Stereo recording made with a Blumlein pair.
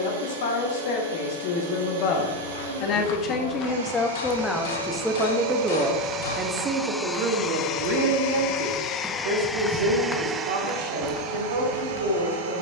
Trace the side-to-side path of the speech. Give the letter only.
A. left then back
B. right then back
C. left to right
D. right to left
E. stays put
C.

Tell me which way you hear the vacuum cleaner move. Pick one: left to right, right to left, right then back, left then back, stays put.
left then back.